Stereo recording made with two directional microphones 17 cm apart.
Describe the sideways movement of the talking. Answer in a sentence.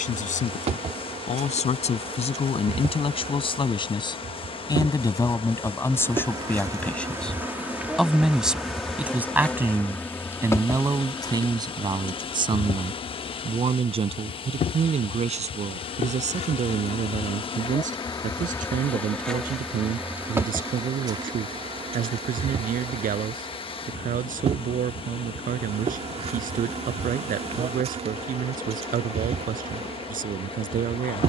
In this clip you hear the talking move from left to right.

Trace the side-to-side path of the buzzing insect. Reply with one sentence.
You can hear the buzzing insect go left and come back.